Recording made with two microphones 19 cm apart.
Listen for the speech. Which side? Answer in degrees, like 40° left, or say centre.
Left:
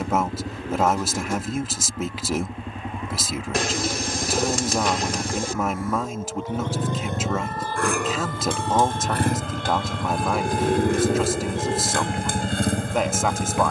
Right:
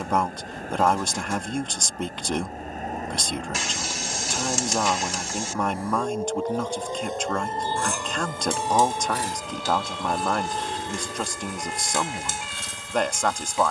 centre.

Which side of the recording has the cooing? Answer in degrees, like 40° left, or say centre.
60° left.